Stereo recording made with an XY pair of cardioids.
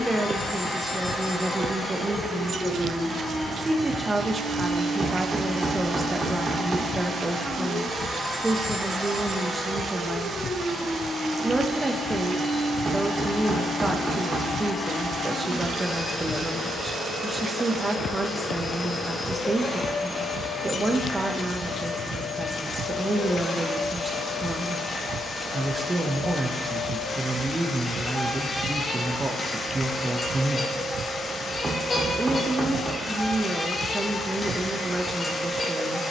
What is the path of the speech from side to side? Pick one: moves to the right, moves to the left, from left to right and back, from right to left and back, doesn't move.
doesn't move.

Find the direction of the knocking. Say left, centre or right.
right.